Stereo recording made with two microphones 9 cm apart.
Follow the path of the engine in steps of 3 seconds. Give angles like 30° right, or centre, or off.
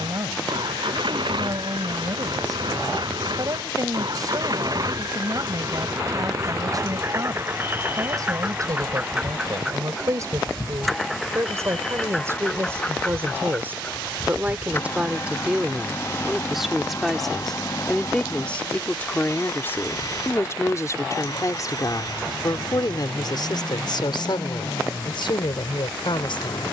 60° right, 50° right, 30° right, centre, 20° left, 30° left, 40° left, 40° left, 50° left.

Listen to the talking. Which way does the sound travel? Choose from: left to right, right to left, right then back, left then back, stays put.
right to left.